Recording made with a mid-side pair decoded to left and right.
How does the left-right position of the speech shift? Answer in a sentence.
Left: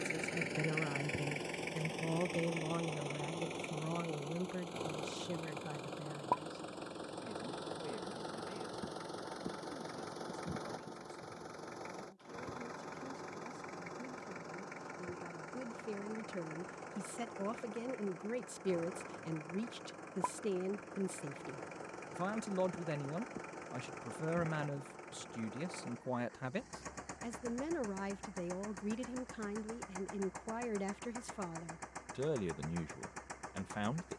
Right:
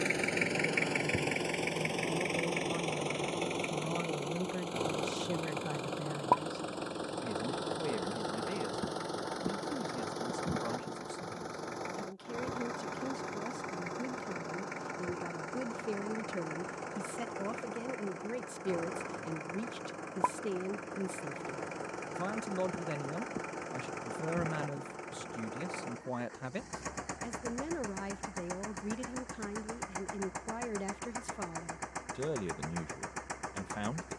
In this clip you hear the speech move from left to right and back again.